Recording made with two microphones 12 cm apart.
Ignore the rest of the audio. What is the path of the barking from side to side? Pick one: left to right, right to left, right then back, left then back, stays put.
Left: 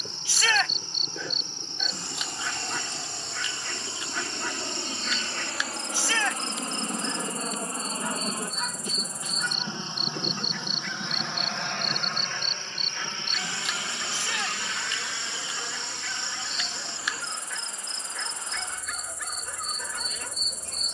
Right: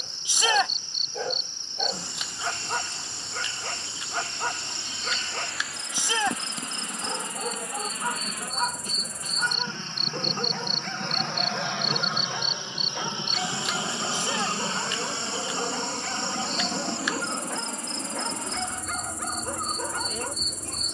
stays put.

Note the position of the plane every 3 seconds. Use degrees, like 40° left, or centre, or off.
70° left, 60° left, 40° left, 10° left, 20° right, 40° right, 60° right.